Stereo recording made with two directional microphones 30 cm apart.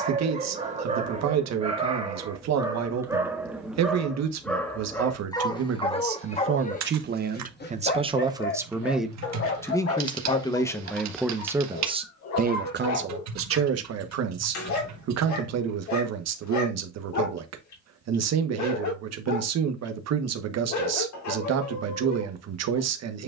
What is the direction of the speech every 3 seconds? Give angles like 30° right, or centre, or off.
60° right, 60° right, 30° right, centre, 50° right, 60° right, 60° right, 60° right.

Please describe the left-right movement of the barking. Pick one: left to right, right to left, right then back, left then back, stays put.
right to left.